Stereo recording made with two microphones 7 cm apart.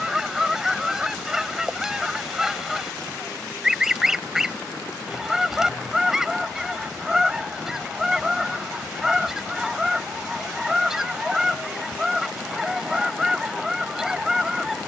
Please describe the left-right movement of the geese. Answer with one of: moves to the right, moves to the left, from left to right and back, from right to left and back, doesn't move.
doesn't move.